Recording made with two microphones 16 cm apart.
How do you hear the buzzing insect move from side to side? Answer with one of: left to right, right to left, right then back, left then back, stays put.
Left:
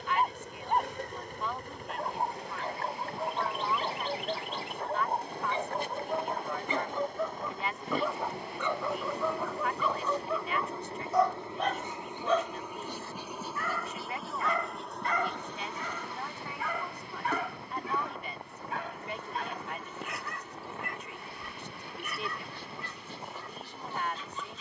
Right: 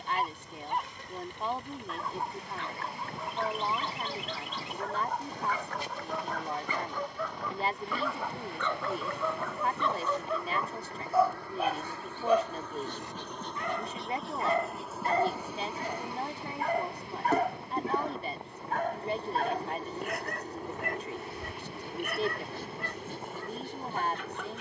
left to right.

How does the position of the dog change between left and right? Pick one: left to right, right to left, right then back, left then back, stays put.
left to right.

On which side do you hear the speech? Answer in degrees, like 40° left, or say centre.
40° right.